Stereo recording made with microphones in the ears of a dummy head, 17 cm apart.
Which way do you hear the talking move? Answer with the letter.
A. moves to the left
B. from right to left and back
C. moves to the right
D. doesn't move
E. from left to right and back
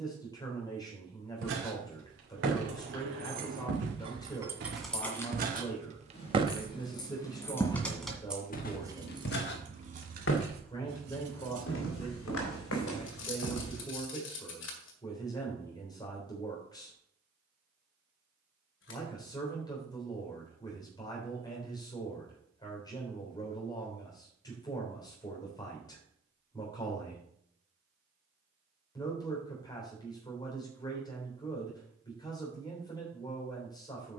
D.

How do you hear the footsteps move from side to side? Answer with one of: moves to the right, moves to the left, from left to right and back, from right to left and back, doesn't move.
moves to the left.